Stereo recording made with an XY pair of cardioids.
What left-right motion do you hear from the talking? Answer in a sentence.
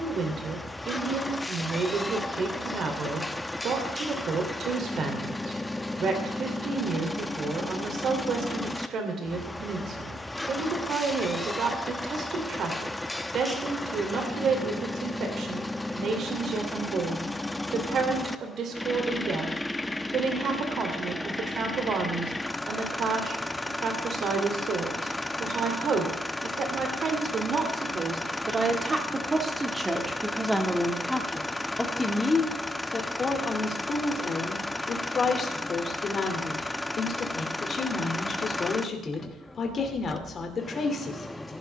You can hear the talking travel towards the left.